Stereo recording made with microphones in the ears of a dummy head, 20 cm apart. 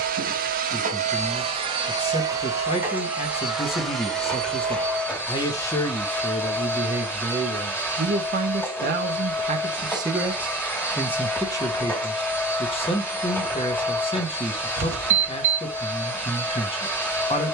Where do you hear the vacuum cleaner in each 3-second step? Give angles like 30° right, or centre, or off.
30° right, centre, 10° left, 10° left, 10° left, 10° left.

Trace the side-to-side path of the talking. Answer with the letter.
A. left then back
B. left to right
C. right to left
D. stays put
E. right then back
E.